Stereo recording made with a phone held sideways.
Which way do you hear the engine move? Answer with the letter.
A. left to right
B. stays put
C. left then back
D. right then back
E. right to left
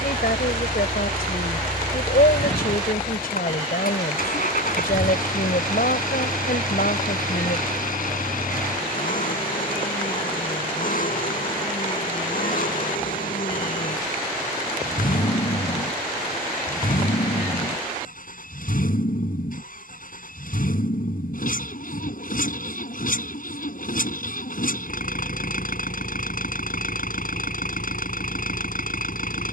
B.